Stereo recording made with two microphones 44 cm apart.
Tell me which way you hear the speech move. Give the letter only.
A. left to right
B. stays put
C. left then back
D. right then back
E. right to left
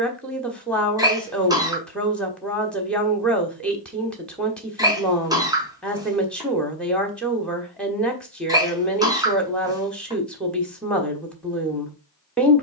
B.